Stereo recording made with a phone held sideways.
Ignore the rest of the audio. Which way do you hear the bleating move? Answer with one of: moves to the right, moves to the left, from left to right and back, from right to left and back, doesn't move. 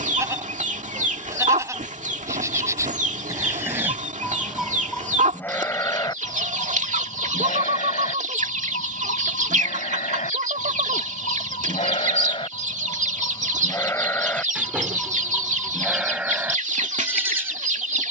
from right to left and back.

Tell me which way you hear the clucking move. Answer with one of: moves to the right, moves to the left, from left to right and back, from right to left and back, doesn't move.
doesn't move.